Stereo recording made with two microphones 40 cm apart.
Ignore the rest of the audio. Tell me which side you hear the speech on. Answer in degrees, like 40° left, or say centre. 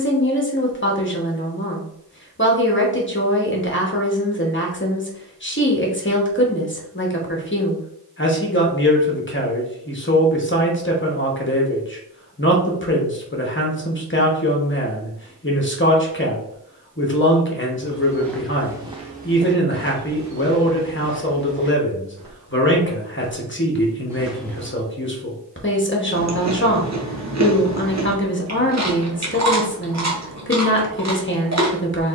30° left.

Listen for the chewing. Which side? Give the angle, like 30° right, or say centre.
40° right.